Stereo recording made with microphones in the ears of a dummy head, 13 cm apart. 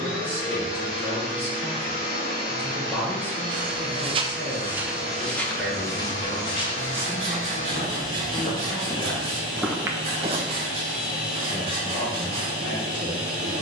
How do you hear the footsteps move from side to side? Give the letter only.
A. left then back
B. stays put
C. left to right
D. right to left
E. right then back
A.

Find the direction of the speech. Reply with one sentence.
You can hear the speech in the centre.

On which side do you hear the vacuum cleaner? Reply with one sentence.
You can hear the vacuum cleaner on the left.